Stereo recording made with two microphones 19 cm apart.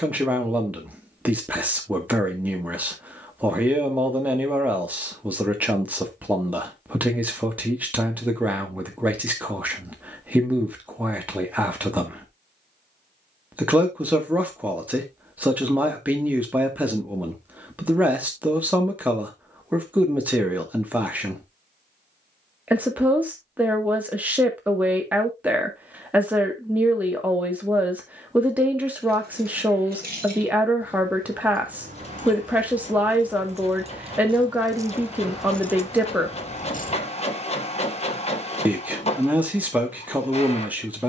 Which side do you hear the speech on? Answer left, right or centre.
centre.